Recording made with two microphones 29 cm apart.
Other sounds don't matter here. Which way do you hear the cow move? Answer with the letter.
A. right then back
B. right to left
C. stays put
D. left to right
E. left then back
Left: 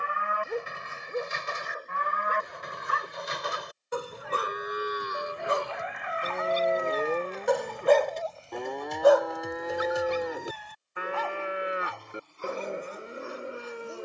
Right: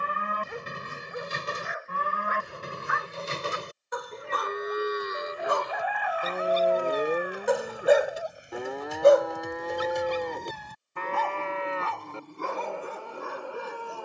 B.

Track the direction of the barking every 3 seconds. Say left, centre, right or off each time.
left, left, centre, right, right.